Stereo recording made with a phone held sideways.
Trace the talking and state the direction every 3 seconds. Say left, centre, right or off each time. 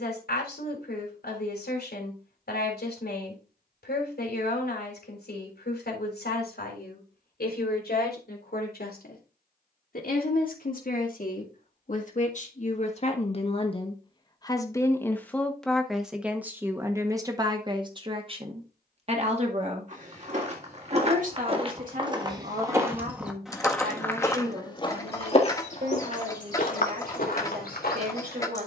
left, left, left, left, left, centre, right, right, right, right.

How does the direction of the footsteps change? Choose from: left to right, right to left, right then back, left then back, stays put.
right to left.